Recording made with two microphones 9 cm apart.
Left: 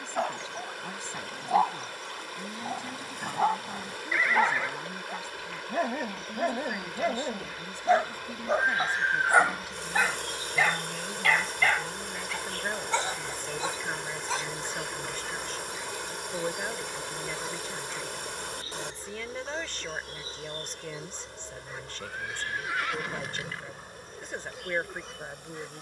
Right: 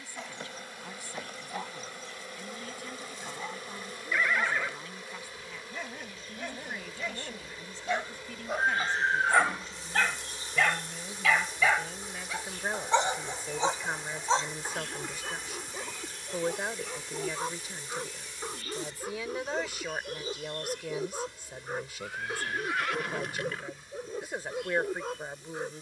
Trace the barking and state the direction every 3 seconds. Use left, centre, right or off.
left, left, left, centre, right, right, right, right, right.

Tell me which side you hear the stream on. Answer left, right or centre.
left.